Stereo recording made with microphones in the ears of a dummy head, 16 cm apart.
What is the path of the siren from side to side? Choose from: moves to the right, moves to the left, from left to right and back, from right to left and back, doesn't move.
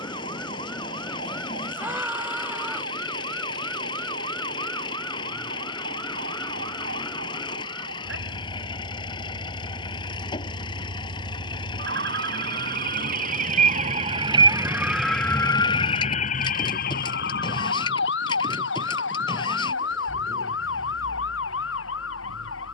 moves to the left.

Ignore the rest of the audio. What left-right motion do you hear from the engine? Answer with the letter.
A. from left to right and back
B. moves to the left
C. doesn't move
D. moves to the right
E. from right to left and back
C.